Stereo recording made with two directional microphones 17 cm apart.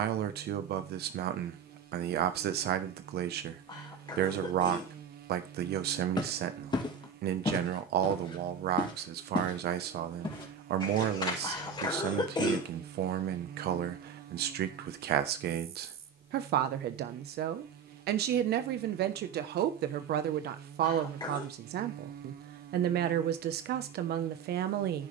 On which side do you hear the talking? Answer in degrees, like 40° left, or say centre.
70° right.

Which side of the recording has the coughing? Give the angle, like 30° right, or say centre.
20° left.